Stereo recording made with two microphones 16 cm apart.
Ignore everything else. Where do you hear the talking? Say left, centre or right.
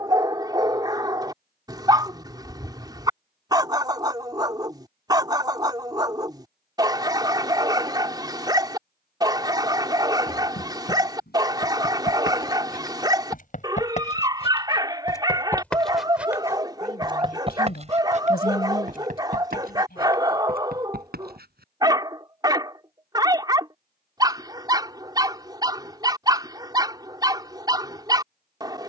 left.